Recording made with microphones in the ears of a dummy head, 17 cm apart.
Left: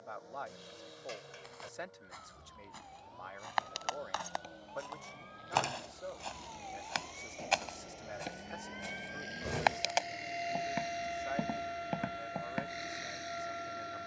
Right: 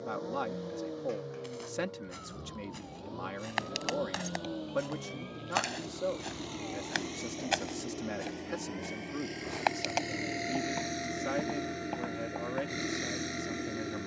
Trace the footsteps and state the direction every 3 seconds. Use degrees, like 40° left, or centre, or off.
30° right, 20° right, 10° right, 10° left, 20° left.